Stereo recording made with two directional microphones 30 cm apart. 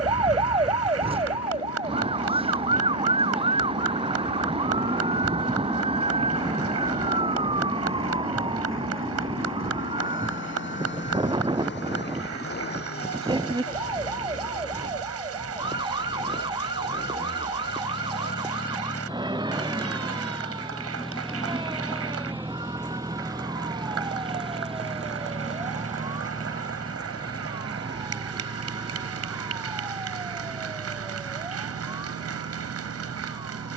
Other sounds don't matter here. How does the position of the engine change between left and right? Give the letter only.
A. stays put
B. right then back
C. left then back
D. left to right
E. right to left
D.